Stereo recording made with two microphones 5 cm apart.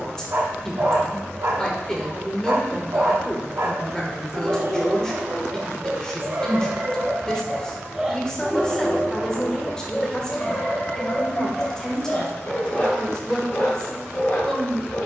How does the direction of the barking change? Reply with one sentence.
You can hear the barking travel towards the left.